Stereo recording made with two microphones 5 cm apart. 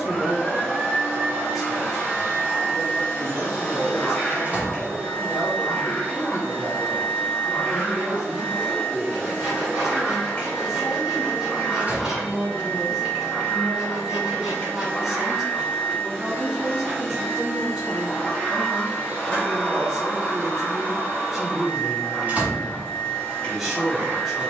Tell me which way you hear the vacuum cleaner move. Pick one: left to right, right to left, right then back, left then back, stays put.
stays put.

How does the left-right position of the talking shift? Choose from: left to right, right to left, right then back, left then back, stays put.
stays put.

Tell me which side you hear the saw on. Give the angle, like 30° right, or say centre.
10° right.